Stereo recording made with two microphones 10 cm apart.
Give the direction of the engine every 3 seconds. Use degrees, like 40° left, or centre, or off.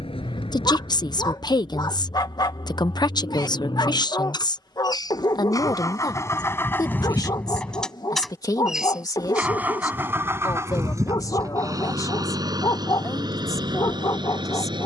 60° left, 50° left, 10° left, 30° right, 50° right.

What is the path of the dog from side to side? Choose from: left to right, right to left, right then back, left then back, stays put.
stays put.